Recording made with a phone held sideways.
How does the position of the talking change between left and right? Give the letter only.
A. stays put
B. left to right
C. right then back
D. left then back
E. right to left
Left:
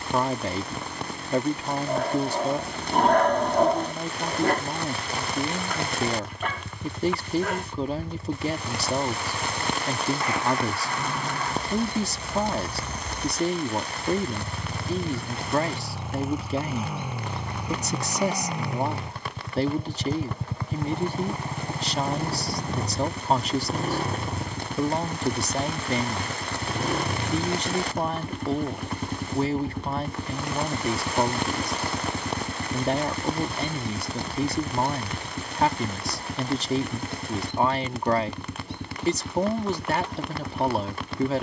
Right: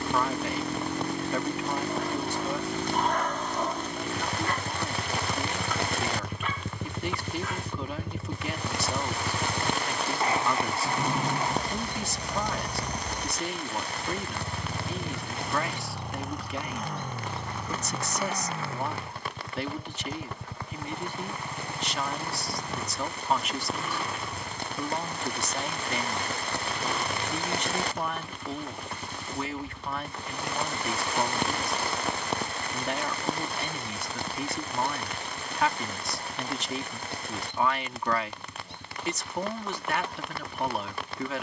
A.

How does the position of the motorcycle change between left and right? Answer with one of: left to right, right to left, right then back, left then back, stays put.
right to left.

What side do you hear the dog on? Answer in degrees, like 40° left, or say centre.
70° left.